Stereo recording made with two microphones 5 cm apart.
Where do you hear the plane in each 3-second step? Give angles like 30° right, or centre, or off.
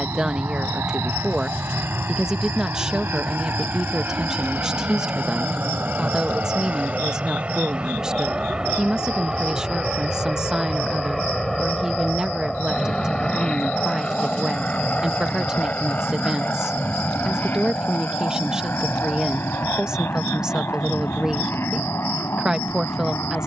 50° right, 40° right, 20° right, 10° right, 10° left, 30° left, 40° left, 50° left.